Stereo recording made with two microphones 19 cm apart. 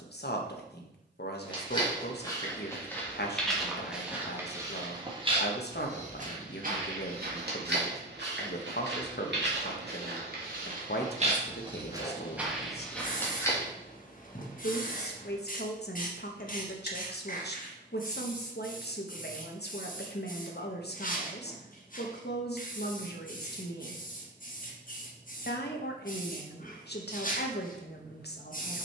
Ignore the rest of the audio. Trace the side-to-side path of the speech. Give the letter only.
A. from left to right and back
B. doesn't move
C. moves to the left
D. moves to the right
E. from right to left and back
B.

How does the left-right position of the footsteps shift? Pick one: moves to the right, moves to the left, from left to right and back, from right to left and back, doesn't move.
from left to right and back.